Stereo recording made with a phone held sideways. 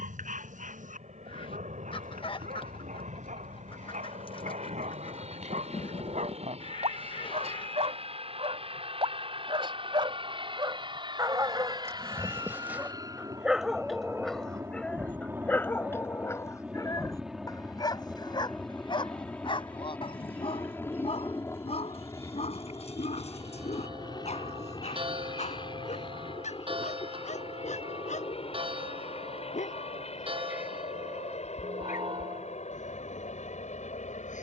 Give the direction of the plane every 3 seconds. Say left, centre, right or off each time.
right, right, right, right, right, centre, centre, left, left, left, left, left.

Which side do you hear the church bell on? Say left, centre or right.
right.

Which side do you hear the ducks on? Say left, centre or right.
left.